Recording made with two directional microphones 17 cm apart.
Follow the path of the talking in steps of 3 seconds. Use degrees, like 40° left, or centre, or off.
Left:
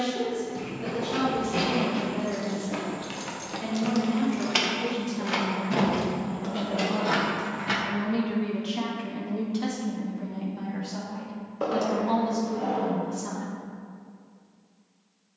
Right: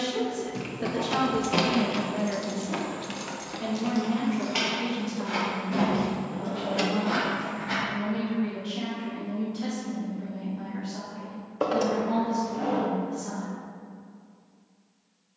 40° right, centre, 30° left, 40° left, 50° left.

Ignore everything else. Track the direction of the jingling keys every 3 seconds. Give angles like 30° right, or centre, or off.
50° right, 30° left, 60° left, off, off.